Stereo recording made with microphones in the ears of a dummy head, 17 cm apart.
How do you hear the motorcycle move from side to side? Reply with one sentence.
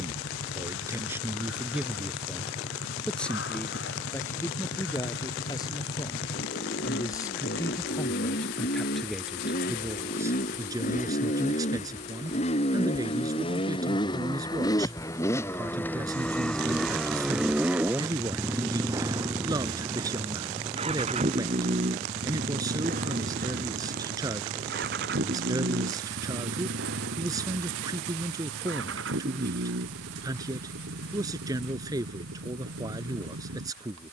You can hear the motorcycle move to the right.